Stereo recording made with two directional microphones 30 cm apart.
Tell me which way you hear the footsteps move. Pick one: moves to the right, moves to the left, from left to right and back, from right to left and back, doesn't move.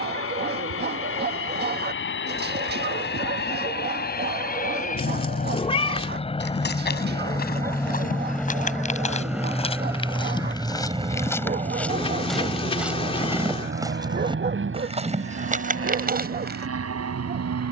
moves to the right.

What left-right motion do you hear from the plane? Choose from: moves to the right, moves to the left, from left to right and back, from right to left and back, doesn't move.
moves to the right.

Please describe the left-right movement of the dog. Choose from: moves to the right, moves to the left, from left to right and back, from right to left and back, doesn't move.
doesn't move.